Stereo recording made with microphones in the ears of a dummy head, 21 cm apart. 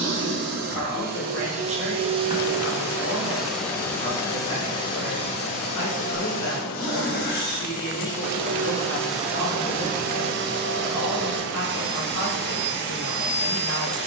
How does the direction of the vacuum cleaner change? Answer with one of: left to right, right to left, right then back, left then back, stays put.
left then back.